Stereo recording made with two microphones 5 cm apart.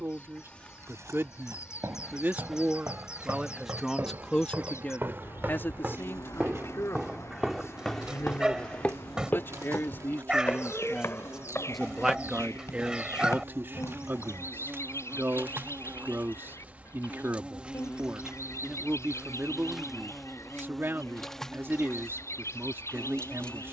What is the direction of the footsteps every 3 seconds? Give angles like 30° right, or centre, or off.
70° right, 50° right, centre, 50° left, 60° left, off, off, off.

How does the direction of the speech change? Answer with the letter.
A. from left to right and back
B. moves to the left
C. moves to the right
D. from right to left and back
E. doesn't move
D.